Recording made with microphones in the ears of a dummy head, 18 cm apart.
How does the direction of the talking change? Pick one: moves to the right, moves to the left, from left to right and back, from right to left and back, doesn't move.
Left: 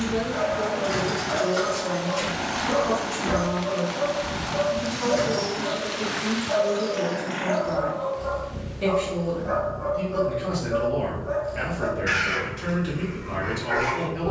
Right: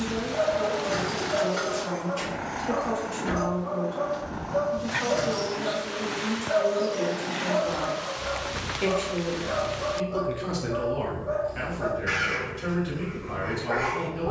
from left to right and back.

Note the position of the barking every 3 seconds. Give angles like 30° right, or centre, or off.
10° left, 20° right, 10° right, 20° left, 20° left.